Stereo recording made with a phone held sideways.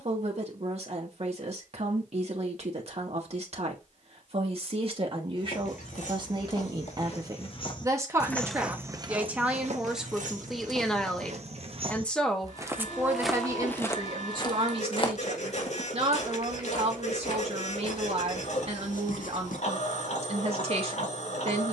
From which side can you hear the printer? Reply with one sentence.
You can hear the printer on the left.